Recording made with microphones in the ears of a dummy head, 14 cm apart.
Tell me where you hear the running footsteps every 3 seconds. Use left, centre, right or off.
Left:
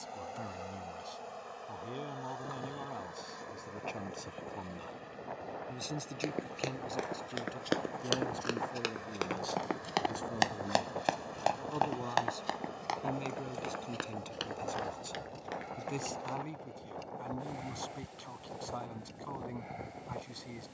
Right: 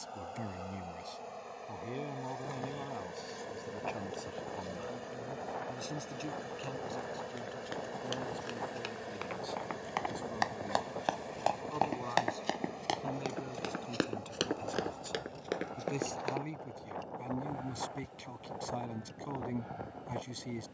off, off, left, left, right, right, off.